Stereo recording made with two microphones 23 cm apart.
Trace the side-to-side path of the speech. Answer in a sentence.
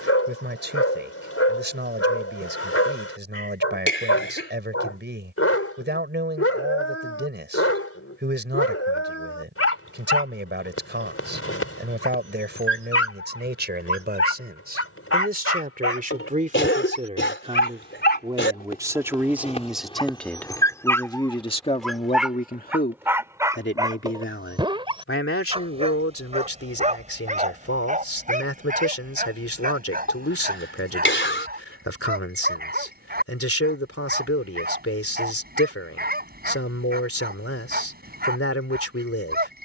You can hear the speech go from the right side to the left.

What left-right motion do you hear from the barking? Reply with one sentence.
In this clip you hear the barking travel towards the right.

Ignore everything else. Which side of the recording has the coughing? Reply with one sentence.
In this clip you hear the coughing on the left.